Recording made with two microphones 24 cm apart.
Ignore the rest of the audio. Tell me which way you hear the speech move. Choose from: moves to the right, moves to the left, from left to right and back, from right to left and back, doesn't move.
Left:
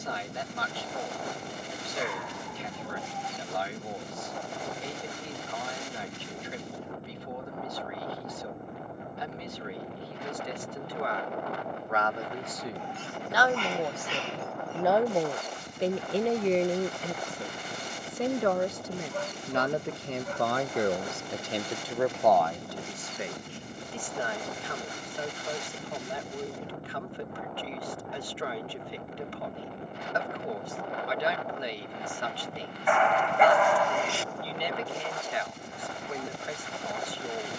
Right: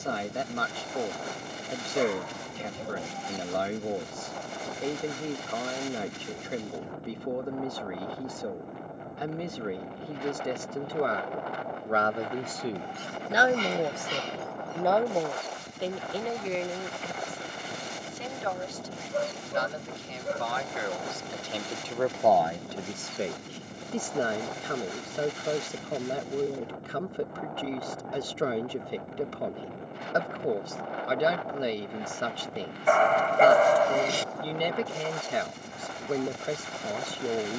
from right to left and back.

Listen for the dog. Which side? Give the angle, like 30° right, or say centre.
40° right.